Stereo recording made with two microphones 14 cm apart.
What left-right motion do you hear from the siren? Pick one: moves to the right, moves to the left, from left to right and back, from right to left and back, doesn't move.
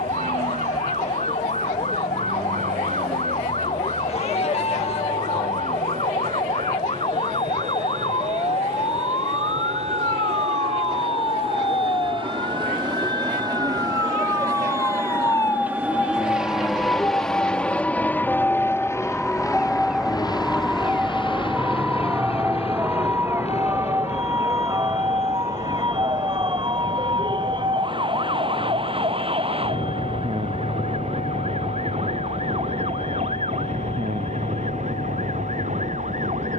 moves to the right.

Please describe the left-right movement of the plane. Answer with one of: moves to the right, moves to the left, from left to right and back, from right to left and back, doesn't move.
moves to the left.